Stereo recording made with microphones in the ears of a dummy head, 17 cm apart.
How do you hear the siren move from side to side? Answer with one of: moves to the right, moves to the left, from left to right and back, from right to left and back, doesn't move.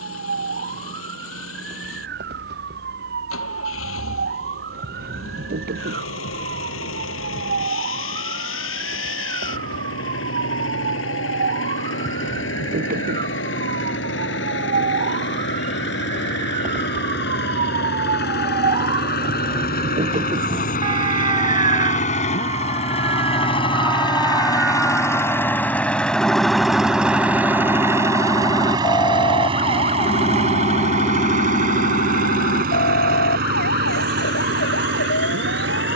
moves to the left.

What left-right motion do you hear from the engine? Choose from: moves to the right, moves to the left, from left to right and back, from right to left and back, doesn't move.
moves to the right.